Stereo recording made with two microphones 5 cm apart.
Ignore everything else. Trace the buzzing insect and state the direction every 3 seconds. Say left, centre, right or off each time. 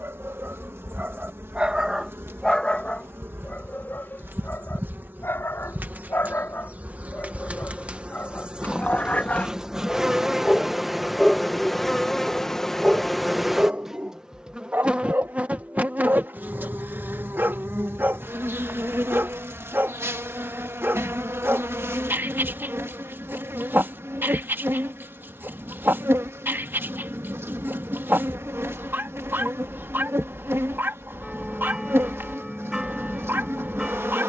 right, right, right, centre, centre, right, right, right, right, right, right, right.